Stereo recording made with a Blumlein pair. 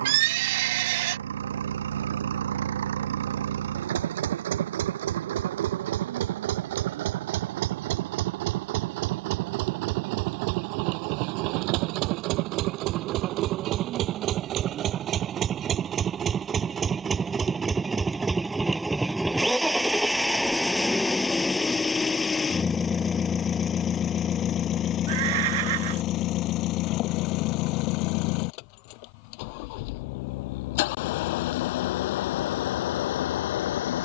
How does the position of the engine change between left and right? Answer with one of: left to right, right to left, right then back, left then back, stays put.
right to left.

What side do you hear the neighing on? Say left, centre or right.
right.